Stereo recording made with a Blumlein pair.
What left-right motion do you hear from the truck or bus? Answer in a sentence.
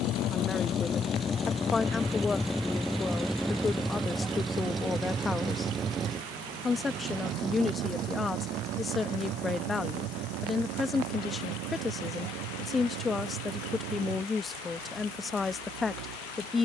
In this clip you hear the truck or bus move to the right.